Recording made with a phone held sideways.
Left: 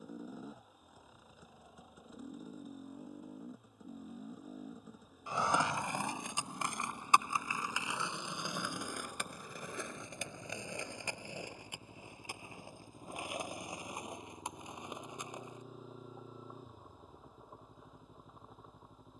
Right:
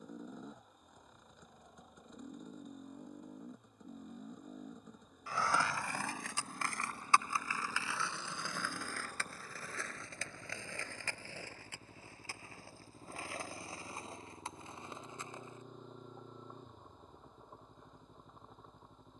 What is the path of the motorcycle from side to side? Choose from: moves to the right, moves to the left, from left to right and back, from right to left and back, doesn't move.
doesn't move.